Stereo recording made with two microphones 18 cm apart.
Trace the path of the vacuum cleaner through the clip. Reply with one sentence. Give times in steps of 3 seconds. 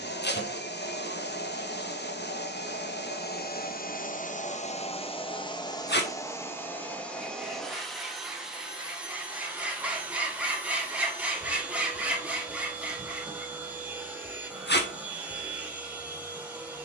In this clip you hear the vacuum cleaner on the left from 0 s and in the centre from 6 s.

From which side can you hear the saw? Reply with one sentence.
In this clip you hear the saw in the centre.